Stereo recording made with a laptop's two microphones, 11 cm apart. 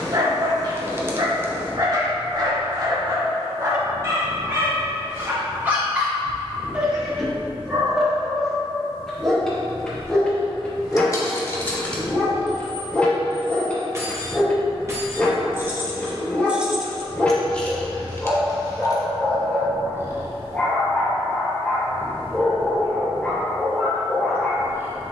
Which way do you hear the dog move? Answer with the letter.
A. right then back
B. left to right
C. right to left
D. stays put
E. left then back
C.